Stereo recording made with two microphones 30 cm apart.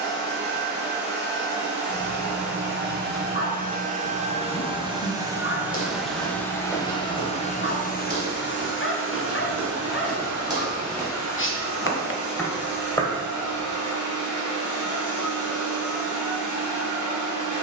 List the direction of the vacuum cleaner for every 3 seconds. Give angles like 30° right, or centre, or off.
30° right, 20° right, 20° left, 60° left, 70° left, 80° left.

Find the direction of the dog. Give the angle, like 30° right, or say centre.
40° left.